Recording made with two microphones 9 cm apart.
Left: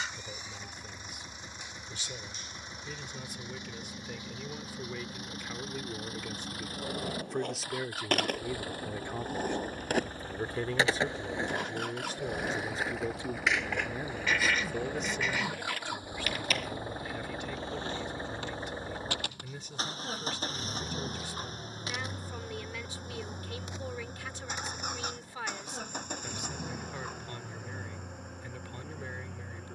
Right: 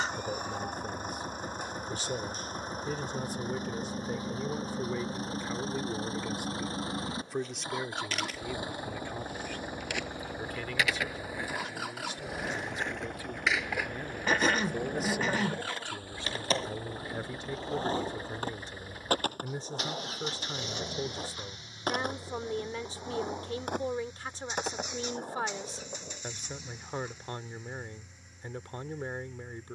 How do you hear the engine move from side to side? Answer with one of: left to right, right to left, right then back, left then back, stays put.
right to left.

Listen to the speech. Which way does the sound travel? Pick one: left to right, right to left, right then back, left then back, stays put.
left then back.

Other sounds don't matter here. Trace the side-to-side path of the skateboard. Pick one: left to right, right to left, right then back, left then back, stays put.
left to right.